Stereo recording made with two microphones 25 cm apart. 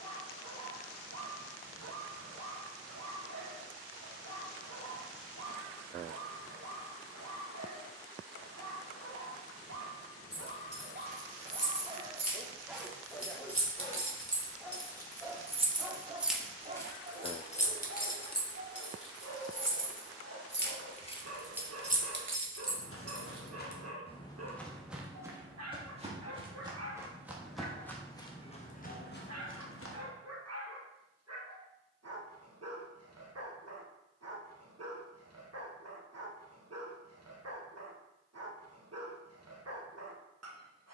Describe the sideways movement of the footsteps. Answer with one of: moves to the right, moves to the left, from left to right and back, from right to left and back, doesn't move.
from left to right and back.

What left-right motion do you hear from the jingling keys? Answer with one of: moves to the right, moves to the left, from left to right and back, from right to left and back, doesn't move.
from right to left and back.